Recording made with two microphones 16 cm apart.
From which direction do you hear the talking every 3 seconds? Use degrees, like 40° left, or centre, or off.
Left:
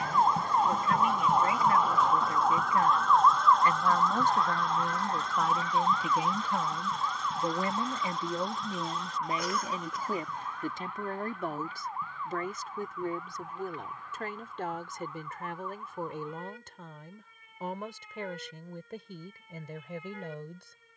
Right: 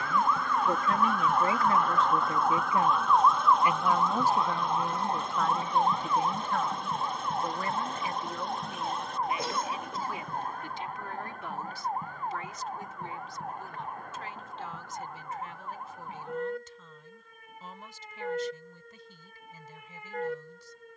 30° right, 10° right, 20° left, 40° left, 50° left, 60° left, 70° left.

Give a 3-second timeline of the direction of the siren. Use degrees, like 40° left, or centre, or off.
20° left, 20° right, 40° right, 40° right, 50° right, 50° right, 50° right.